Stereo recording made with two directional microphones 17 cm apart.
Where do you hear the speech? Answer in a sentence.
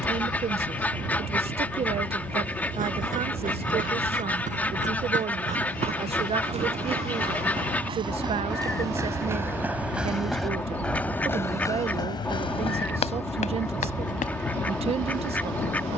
In this clip you hear the speech on the right.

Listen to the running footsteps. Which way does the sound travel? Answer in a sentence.
In this clip you hear the running footsteps go from the right side to the left.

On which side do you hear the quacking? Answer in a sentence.
In this clip you hear the quacking in the centre.